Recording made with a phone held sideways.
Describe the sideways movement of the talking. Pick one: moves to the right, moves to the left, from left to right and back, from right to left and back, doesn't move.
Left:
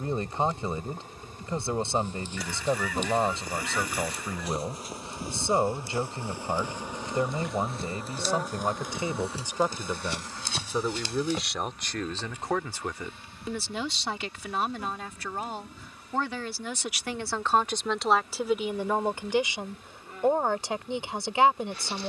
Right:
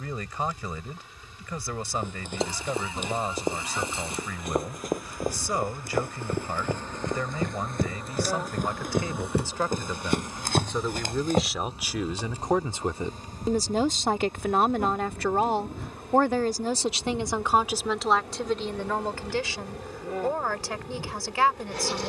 from left to right and back.